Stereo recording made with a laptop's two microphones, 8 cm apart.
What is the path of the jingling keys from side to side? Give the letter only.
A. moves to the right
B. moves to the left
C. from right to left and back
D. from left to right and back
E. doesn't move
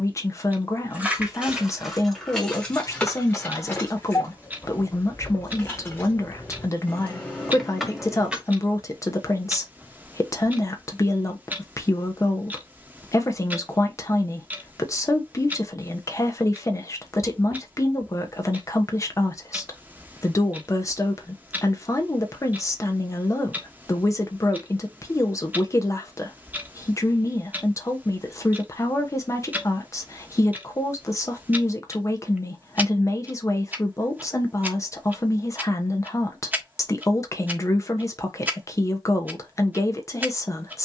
C.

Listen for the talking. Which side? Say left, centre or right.
left.